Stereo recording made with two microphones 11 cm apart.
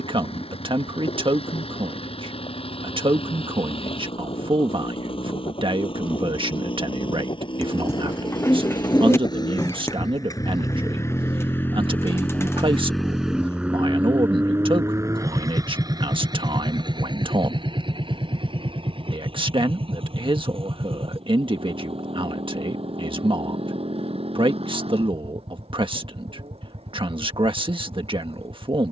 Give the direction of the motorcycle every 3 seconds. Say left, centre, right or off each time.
left, left, left, left, centre, right, right, right, right, right.